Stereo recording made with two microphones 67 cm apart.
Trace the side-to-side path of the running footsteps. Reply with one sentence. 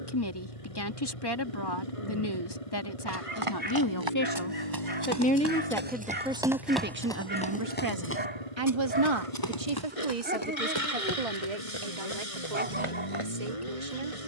In this clip you hear the running footsteps go from the right side to the left.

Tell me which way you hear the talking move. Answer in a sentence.
In this clip you hear the talking move from left to right.